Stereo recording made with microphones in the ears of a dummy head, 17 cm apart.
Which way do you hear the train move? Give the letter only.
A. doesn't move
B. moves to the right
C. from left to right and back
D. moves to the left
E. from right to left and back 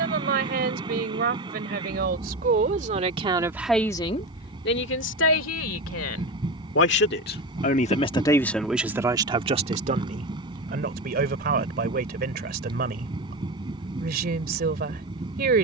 A.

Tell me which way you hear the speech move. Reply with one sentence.
In this clip you hear the speech go left and come back.